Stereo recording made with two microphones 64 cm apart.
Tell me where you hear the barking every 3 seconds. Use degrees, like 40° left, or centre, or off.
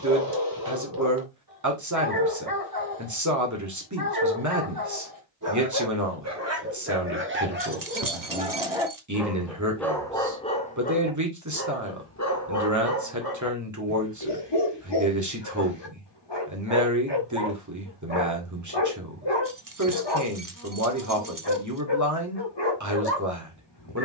30° right, 30° right, 20° right, 10° left, 30° left, 40° left, 40° left, 40° left.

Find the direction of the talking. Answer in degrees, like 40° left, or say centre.
30° right.